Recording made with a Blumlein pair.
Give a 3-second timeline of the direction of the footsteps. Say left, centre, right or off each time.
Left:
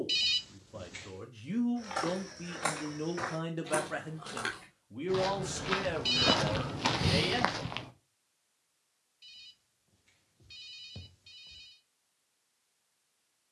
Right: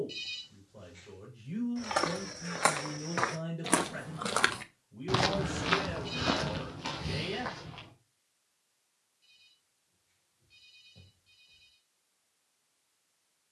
right, right, left, off, off.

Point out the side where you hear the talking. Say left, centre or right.
left.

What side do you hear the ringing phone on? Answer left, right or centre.
left.